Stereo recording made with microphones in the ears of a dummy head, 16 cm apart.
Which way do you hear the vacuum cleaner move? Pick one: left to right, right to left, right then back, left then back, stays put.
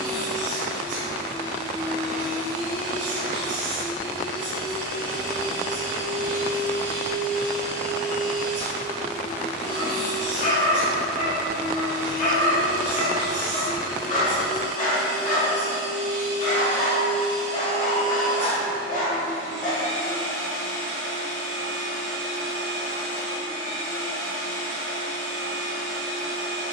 stays put.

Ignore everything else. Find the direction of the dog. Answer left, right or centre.
left.